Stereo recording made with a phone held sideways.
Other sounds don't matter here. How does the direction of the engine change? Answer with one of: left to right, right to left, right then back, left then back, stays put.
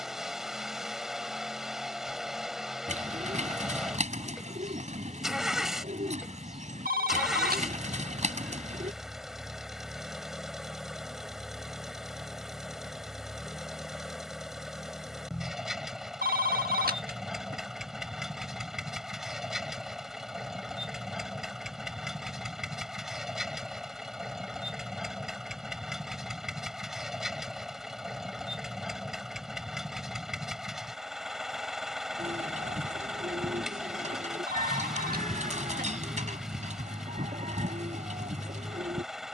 stays put.